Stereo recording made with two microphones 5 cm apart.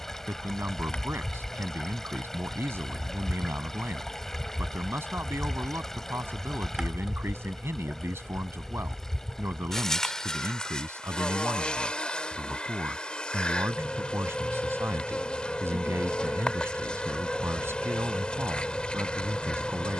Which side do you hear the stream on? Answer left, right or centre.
centre.